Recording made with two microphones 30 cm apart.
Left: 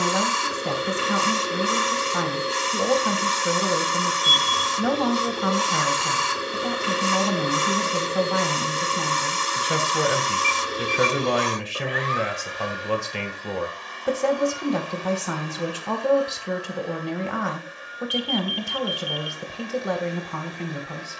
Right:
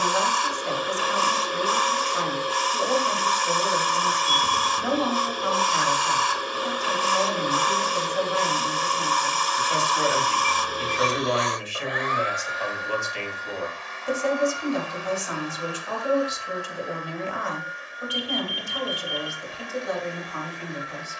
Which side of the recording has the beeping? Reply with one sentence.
You can hear the beeping on the right.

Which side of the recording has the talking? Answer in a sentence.
In this clip you hear the talking on the left.